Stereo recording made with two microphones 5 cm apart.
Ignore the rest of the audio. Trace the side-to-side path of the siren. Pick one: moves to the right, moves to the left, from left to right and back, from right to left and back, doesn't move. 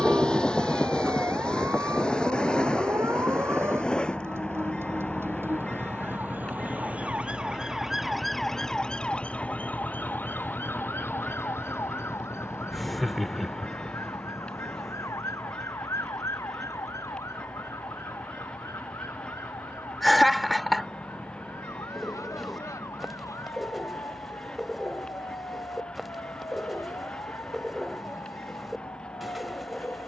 moves to the left.